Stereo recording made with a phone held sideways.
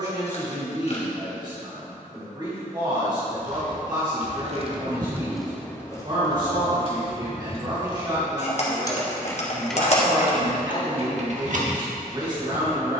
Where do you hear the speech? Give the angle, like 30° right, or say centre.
30° right.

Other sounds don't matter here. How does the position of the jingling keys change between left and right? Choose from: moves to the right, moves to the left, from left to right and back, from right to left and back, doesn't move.
from right to left and back.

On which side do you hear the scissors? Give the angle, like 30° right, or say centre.
50° left.